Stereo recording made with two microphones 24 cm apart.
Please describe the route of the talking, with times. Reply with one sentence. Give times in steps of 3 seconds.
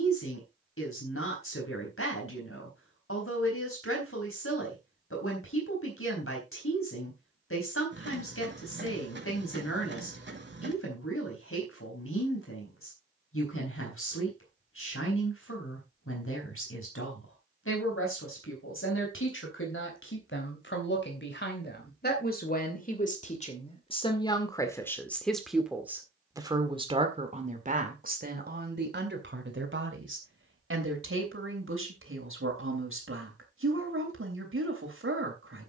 You can hear the talking on the left from 0 s, in the centre from 24 s and on the right from 27 s.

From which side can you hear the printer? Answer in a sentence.
In this clip you hear the printer on the right.